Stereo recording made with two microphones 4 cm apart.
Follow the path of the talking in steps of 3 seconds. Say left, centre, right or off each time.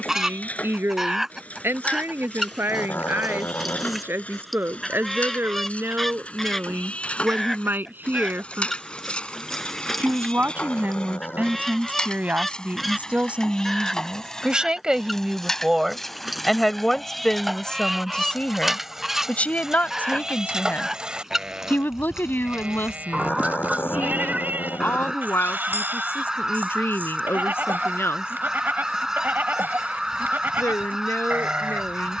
right, right, right, right, right, centre, left, left, left, left, left.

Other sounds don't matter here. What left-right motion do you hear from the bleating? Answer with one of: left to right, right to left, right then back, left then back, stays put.
left to right.